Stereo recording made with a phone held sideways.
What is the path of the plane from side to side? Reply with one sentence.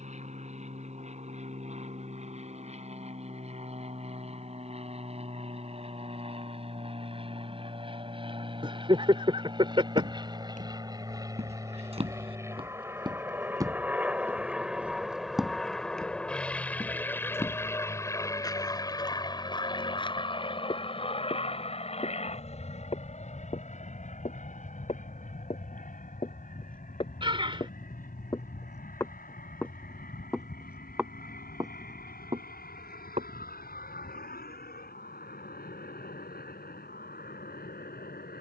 In this clip you hear the plane go from the right side to the left.